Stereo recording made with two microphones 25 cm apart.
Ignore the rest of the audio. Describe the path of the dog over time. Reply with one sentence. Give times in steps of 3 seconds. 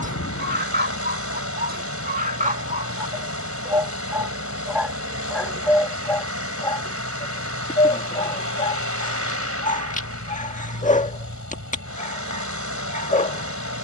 In this clip you hear the dog on the right from 0 s, in the centre from 3 s and on the left from 6 s.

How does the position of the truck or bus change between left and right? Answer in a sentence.
In this clip you hear the truck or bus stay put.